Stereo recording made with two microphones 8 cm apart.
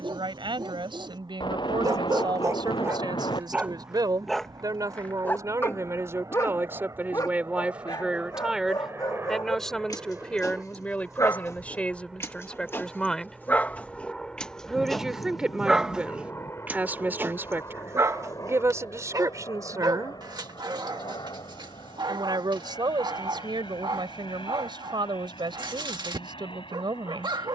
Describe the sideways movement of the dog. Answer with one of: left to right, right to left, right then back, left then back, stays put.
left then back.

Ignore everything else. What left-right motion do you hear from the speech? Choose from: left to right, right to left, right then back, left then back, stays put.
left then back.